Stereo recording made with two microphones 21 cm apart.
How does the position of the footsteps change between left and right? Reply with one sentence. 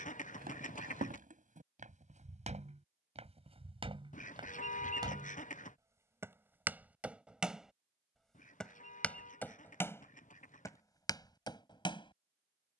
You can hear the footsteps go from the right side to the left.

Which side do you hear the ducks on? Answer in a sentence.
You can hear the ducks on the left.